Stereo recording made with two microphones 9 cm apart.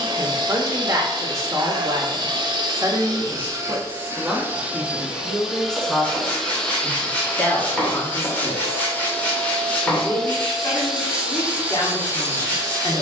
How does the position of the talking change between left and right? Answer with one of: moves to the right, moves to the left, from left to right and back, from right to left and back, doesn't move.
moves to the left.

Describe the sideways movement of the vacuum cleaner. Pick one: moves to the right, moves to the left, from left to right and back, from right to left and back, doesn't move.
from right to left and back.